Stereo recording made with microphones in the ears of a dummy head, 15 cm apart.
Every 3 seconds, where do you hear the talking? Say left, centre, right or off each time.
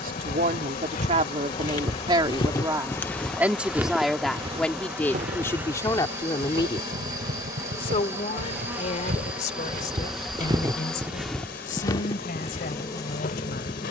right, centre, left, left, left.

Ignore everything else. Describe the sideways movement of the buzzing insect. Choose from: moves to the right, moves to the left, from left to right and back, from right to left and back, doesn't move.
from left to right and back.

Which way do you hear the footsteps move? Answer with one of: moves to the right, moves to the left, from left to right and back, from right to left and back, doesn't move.
from left to right and back.